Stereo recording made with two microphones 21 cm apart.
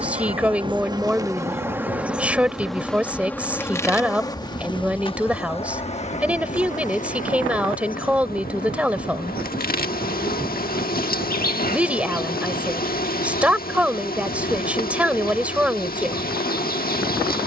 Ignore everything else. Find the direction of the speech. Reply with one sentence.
In this clip you hear the speech in the centre.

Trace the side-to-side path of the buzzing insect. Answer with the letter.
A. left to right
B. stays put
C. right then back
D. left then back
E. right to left
E.